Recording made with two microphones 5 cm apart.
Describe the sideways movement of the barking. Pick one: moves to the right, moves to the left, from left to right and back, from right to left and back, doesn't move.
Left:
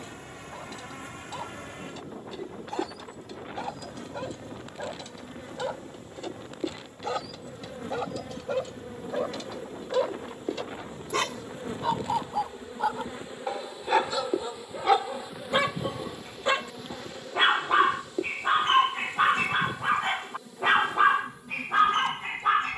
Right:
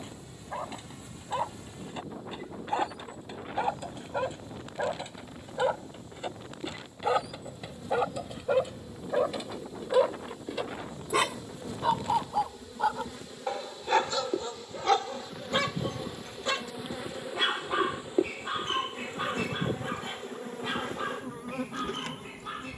moves to the left.